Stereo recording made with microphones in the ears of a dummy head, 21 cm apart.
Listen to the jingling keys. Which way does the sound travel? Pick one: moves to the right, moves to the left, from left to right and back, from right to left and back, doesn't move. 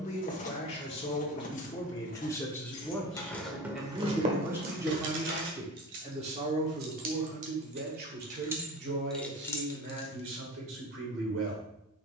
from left to right and back.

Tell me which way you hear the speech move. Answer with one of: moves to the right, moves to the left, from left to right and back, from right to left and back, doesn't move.
moves to the right.